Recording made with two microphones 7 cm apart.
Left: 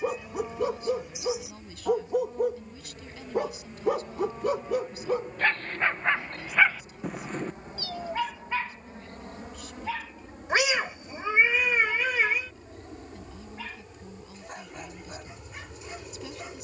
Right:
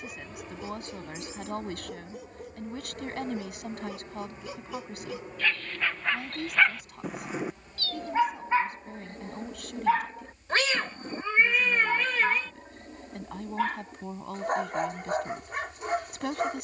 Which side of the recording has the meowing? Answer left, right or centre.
centre.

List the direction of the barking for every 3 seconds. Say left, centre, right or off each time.
left, left, centre, right, right, right.